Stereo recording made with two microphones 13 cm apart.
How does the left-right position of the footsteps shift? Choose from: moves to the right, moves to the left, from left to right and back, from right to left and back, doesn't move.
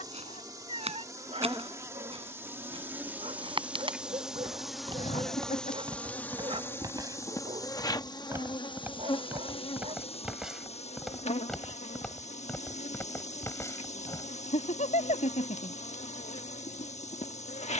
moves to the left.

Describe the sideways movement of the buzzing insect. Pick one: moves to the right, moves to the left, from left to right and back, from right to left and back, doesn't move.
moves to the left.